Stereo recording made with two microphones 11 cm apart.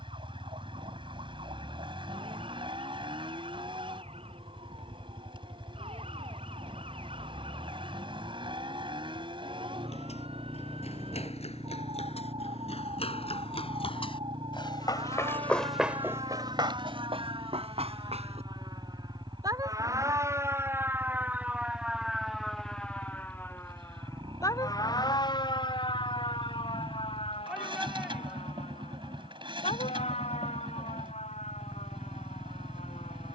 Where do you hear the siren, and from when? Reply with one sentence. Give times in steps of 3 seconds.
You can hear the siren on the right from 0 s, in the centre from 21 s and on the left from 24 s.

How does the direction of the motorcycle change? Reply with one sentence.
In this clip you hear the motorcycle stay in one place.